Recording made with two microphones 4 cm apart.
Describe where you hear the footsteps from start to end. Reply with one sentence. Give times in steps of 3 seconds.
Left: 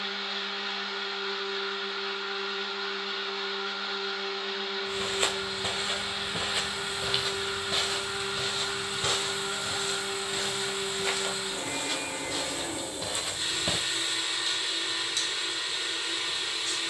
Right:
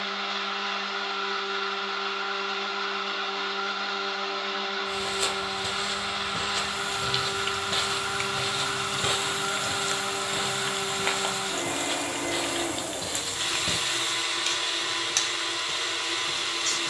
You can hear the footsteps not at all from 0 s, on the left from 3 s, in the centre from 6 s, on the right from 9 s, in the centre from 12 s and not at all from 15 s.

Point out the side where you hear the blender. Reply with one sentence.
In this clip you hear the blender on the right.